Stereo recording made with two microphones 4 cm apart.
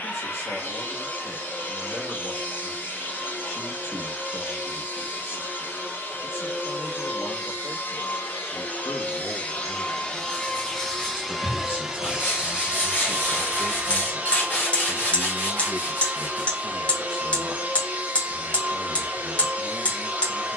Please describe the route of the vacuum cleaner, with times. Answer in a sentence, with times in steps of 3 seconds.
You can hear the vacuum cleaner on the left from 0 s, in the centre from 9 s and on the right from 12 s.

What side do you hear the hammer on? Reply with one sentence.
In this clip you hear the hammer on the left.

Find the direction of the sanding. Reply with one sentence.
You can hear the sanding on the left.